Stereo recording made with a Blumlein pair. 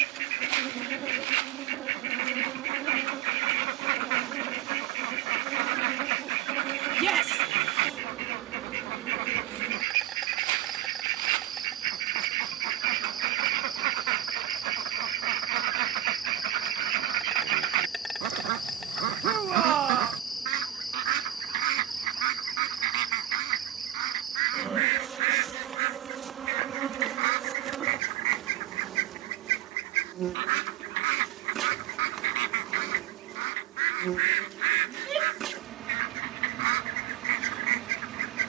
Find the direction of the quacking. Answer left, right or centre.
right.